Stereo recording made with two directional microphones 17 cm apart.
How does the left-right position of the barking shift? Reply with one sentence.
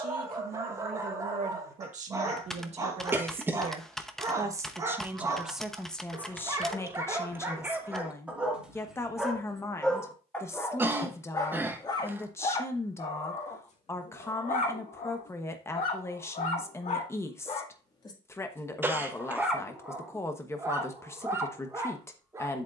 In this clip you hear the barking go left and come back.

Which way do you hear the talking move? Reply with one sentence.
You can hear the talking travel towards the left.